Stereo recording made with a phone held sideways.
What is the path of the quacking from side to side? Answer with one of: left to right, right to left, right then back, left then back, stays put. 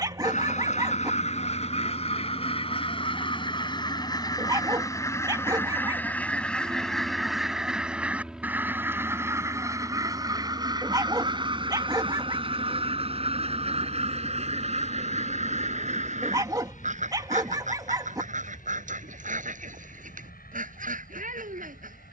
left to right.